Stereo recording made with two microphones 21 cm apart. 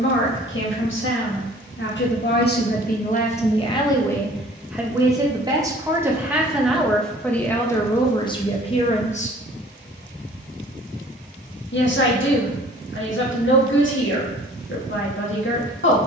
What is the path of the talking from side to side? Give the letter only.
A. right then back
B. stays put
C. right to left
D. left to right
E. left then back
A.